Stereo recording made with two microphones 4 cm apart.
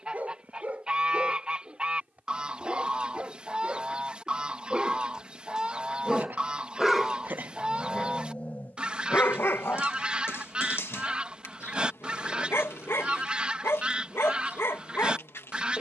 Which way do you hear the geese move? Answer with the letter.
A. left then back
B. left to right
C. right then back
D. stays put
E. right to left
D.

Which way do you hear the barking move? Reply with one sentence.
You can hear the barking travel towards the left.